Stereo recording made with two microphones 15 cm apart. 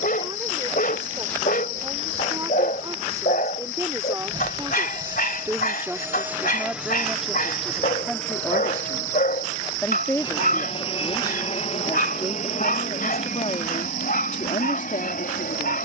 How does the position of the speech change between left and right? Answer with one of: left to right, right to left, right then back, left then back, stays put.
right to left.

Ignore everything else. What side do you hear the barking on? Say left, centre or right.
left.